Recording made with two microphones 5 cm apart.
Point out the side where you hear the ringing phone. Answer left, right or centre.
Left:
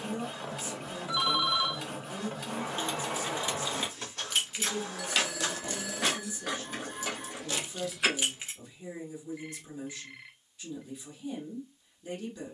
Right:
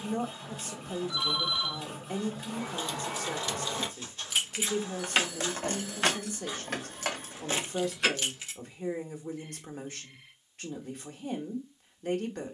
left.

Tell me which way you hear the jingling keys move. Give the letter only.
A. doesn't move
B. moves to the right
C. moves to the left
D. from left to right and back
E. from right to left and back
D.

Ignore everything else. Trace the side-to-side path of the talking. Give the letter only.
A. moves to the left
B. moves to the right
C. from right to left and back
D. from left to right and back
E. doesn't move
E.